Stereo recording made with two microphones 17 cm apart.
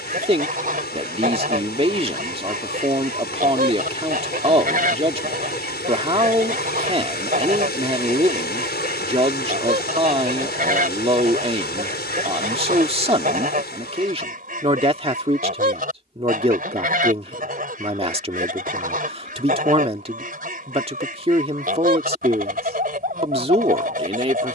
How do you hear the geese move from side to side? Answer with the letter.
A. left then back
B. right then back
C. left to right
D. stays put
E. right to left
D.